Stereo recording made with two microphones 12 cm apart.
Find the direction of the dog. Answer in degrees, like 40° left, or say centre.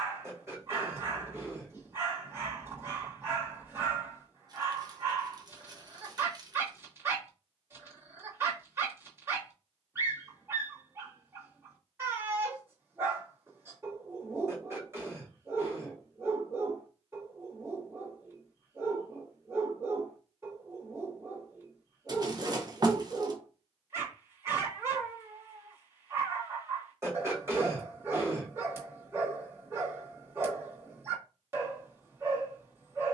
20° right.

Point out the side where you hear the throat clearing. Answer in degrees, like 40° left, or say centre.
20° right.